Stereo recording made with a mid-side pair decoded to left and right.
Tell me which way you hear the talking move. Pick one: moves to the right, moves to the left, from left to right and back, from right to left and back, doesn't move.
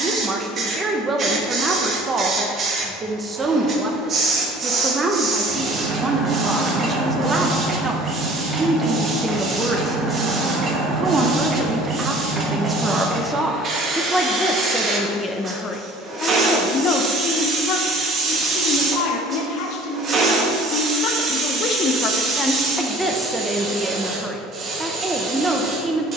from right to left and back.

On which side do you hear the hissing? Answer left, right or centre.
right.